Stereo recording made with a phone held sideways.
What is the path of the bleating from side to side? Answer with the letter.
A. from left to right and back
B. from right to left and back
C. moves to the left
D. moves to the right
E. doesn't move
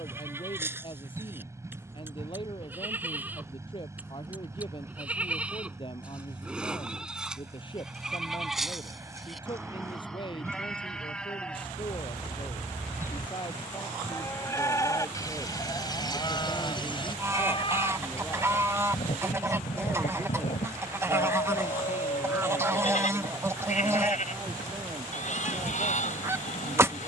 C.